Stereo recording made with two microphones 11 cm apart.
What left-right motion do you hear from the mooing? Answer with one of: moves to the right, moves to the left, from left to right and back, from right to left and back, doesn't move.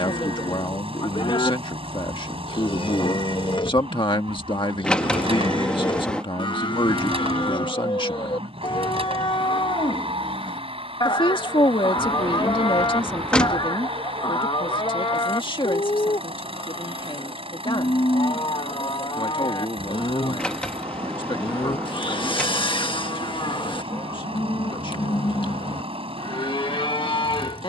doesn't move.